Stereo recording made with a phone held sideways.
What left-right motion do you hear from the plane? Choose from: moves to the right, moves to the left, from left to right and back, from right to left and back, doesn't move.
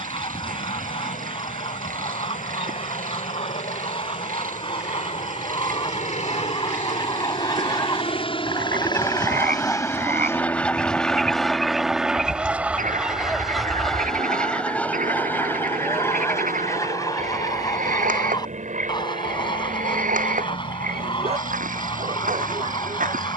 moves to the right.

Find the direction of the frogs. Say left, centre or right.
right.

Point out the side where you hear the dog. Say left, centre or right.
right.